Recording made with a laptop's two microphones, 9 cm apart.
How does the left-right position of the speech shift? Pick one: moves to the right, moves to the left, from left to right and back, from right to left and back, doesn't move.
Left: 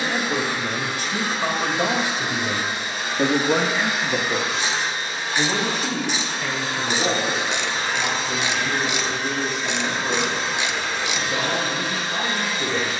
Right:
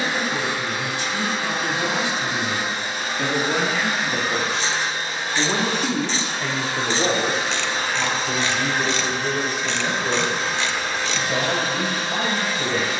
moves to the right.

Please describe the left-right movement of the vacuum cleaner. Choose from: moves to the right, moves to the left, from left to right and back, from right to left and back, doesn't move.
doesn't move.